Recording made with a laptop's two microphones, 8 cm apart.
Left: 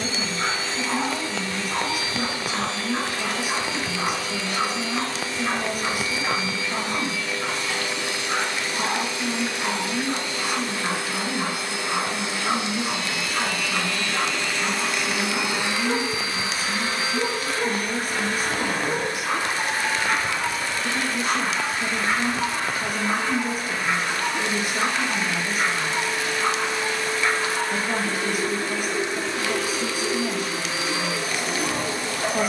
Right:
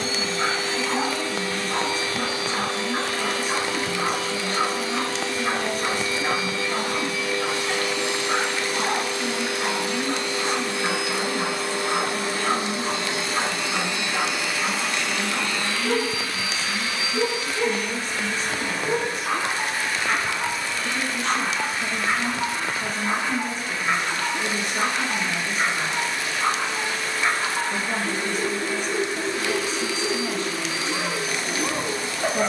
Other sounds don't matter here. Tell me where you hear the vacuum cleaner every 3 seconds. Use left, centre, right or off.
right, right, right, right, right, left, left, left, left, left, left.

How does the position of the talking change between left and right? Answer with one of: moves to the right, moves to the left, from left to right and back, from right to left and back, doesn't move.
doesn't move.